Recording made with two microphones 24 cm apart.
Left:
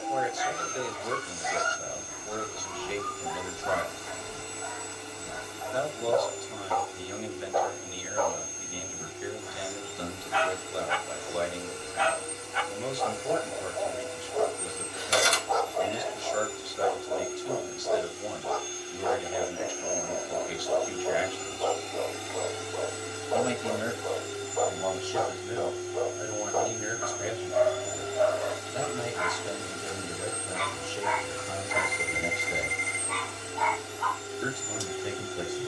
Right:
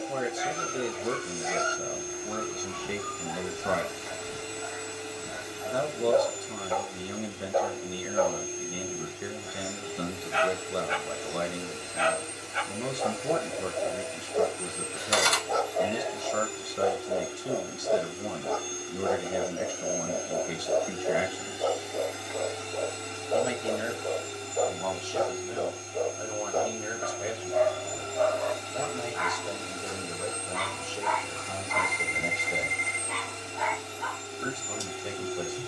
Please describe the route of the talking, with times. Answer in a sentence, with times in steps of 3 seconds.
In this clip you hear the talking on the right from 0 s and in the centre from 24 s.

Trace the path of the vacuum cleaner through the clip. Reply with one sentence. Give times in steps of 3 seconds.
In this clip you hear the vacuum cleaner on the right from 0 s and in the centre from 21 s.